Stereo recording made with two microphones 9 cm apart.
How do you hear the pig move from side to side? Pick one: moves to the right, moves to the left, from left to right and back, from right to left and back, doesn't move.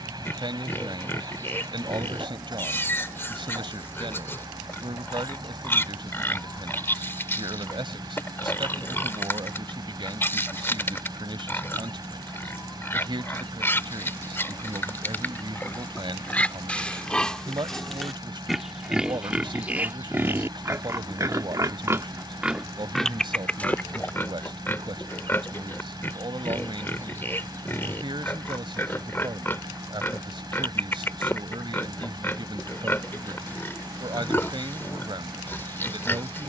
from left to right and back.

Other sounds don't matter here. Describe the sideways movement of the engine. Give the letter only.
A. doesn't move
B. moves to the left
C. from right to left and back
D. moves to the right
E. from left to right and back
A.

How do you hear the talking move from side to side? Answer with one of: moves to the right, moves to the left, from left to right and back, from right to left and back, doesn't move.
doesn't move.